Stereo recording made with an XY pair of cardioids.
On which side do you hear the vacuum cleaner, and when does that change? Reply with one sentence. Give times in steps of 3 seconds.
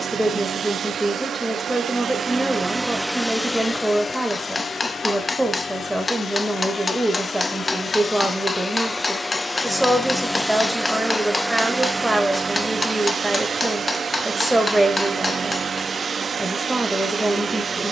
You can hear the vacuum cleaner on the right from 0 s, on the left from 3 s, in the centre from 9 s and on the right from 12 s.